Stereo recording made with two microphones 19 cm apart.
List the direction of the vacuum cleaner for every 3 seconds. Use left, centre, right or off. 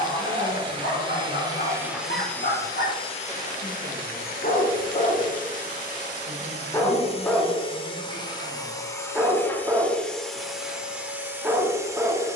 centre, left, left, centre.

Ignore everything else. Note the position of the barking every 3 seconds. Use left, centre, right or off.
left, left, centre, centre.